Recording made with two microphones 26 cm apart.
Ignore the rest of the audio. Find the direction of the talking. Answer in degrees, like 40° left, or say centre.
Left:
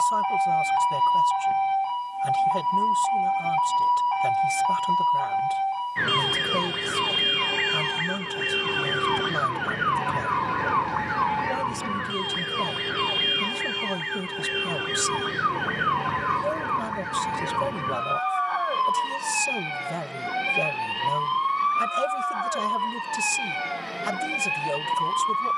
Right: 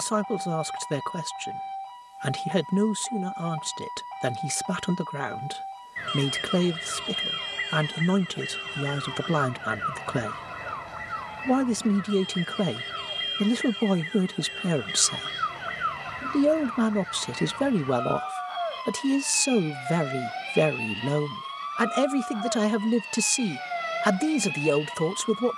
80° right.